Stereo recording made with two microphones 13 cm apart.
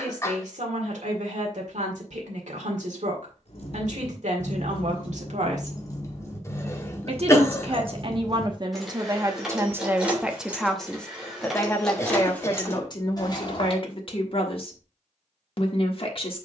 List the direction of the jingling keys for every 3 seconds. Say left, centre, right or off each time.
off, left, centre, centre, left, off.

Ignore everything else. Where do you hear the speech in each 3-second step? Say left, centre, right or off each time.
right, right, right, centre, left, left.